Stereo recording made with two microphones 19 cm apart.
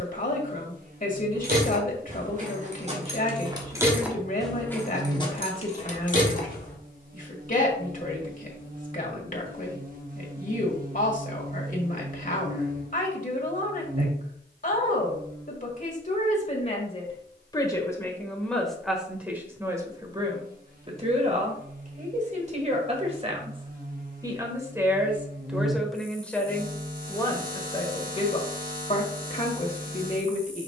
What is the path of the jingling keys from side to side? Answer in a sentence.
You can hear the jingling keys go from the right side to the left.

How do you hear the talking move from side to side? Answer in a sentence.
You can hear the talking go right and come back.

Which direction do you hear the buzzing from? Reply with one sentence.
In this clip you hear the buzzing on the right.